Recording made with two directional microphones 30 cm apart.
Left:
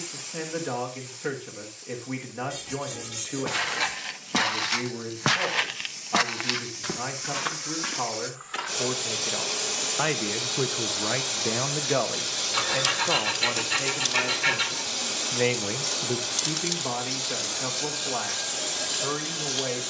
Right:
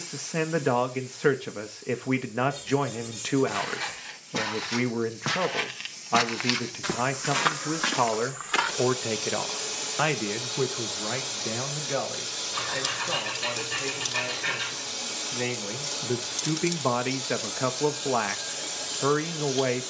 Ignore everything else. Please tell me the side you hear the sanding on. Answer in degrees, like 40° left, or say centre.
50° left.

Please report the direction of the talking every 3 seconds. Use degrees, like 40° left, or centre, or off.
60° right, 60° right, 60° right, centre, 40° left, 30° right, 50° right.